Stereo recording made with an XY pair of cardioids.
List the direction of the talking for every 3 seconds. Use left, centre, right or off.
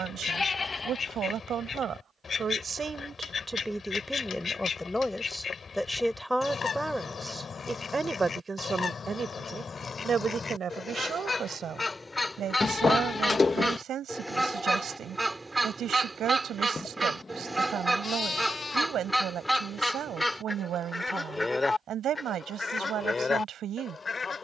right, centre, centre, right, right, right, right, right.